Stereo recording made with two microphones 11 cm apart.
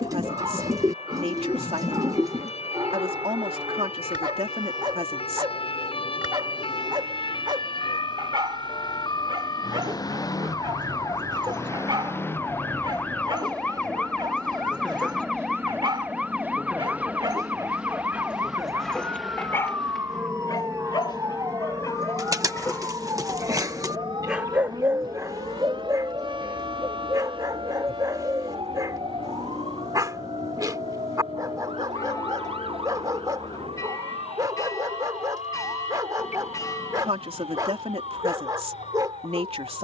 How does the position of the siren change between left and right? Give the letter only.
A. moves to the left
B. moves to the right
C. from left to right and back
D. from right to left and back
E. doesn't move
B.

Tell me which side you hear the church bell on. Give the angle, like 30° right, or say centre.
30° left.